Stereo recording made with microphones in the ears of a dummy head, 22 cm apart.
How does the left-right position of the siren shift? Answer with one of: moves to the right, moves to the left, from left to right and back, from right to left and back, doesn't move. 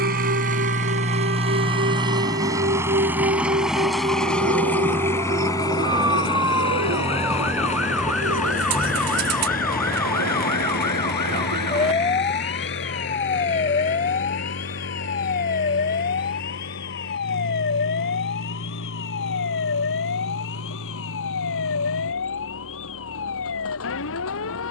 moves to the left.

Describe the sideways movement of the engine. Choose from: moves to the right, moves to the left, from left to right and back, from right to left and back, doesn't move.
moves to the left.